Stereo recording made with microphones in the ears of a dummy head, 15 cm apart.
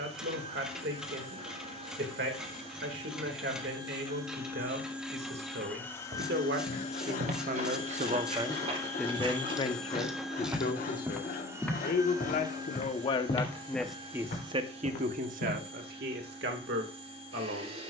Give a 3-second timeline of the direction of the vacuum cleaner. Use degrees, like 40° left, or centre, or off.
40° right, 10° right, 30° left, centre, 30° right, 40° right.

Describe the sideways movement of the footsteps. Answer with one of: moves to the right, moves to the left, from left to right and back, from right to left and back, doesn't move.
moves to the left.